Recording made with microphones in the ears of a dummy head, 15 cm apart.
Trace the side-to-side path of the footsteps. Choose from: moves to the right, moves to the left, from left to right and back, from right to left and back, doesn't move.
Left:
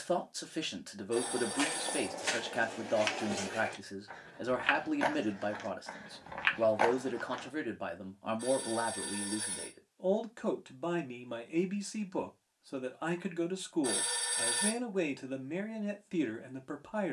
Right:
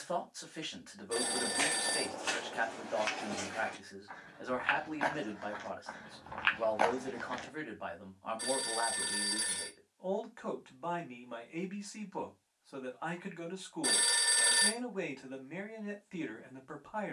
from right to left and back.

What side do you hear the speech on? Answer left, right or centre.
left.